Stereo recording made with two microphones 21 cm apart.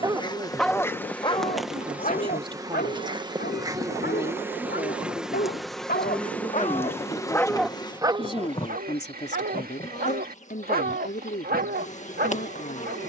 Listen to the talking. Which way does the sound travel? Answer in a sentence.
In this clip you hear the talking go from the right side to the left.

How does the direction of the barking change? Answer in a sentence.
You can hear the barking go left and come back.